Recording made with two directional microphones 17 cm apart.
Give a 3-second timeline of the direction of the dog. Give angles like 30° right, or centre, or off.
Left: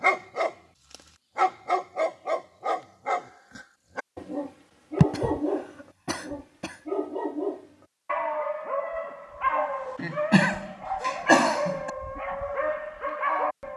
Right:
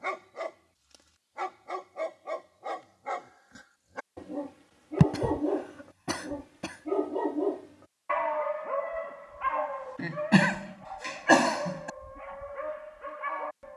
50° left, 20° left, centre, 40° left, 50° left.